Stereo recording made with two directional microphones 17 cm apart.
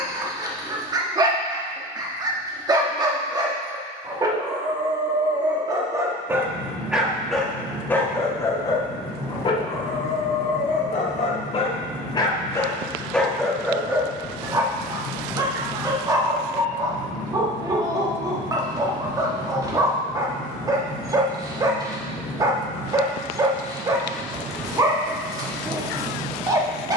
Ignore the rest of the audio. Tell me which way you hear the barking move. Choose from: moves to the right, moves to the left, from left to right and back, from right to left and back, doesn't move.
from right to left and back.